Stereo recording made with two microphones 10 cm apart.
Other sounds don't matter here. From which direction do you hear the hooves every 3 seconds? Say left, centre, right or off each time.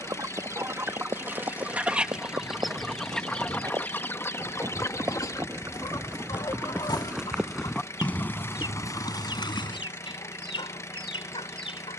right, right, centre, left.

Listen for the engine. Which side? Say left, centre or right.
left.